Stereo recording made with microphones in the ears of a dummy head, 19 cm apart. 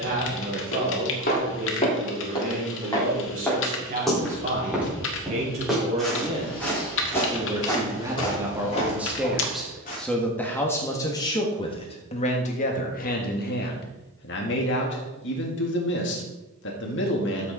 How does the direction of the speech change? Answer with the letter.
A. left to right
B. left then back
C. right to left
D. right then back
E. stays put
C.